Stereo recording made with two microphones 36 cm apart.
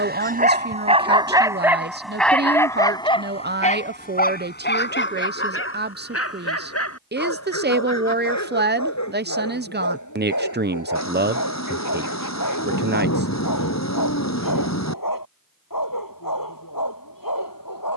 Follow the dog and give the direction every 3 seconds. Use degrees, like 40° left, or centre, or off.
10° right, 30° left, 40° left, 50° left, 60° left, 60° left.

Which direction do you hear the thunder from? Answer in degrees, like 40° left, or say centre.
50° left.